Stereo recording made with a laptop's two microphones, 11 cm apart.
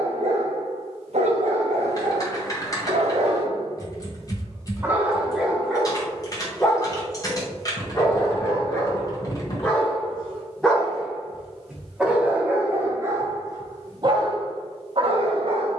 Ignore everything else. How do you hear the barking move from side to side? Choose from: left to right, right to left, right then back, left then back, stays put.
left then back.